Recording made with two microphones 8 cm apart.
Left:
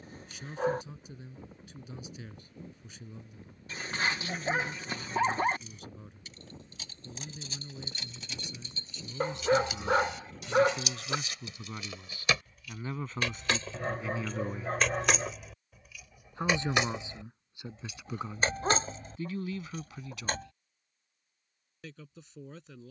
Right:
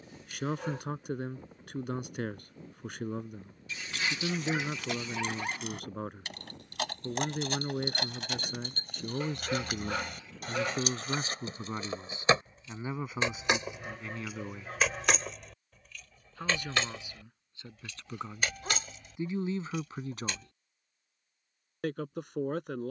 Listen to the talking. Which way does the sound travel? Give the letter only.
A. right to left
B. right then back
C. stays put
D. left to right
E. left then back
E.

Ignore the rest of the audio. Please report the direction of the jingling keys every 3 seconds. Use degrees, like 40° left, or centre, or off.
off, 70° right, 60° right, 50° right, 20° right, 10° left, 40° left, off.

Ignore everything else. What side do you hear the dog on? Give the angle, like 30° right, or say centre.
40° left.